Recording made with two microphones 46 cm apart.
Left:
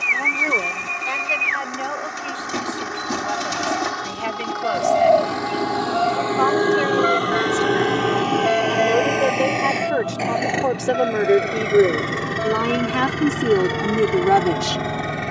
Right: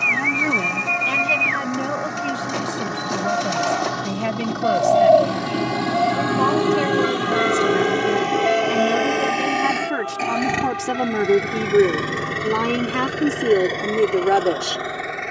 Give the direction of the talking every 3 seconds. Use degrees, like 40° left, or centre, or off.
50° right, 60° right, 50° right, 30° right, 10° left.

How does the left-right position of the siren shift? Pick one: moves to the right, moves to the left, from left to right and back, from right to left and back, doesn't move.
moves to the left.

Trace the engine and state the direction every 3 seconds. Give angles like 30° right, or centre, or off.
60° right, 50° right, 40° right, 20° right, 20° left.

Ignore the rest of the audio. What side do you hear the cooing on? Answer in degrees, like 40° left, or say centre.
30° left.